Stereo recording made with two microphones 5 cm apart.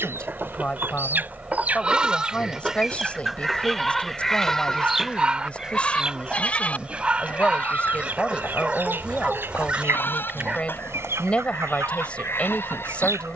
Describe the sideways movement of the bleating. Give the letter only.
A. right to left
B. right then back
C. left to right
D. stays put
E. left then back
A.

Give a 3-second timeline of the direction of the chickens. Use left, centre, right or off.
right, centre, right, right, right.